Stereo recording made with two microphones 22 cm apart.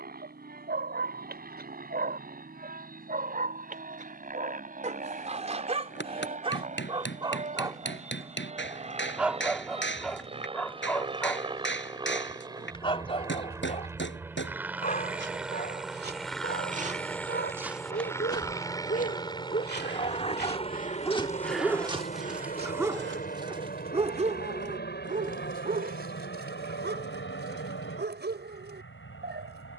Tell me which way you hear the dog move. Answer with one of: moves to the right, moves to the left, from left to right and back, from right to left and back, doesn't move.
from right to left and back.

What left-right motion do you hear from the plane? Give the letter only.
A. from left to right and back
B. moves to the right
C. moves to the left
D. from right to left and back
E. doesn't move
C.